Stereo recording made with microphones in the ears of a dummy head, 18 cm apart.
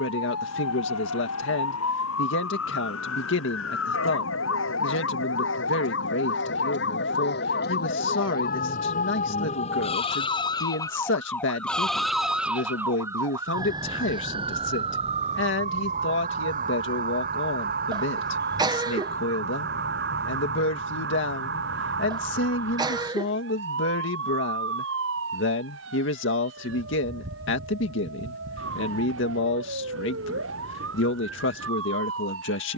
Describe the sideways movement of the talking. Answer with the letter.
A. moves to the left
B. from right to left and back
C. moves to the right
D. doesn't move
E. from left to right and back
D.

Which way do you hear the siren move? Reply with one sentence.
In this clip you hear the siren go from the left side to the right.